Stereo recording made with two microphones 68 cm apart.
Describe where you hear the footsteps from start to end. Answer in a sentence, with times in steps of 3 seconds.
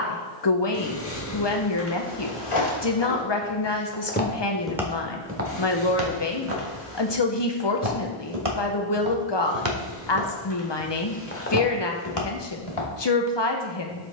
In this clip you hear the footsteps on the left from 0 s, in the centre from 3 s, on the right from 6 s, in the centre from 9 s and on the left from 12 s.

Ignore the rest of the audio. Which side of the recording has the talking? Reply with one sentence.
In this clip you hear the talking on the left.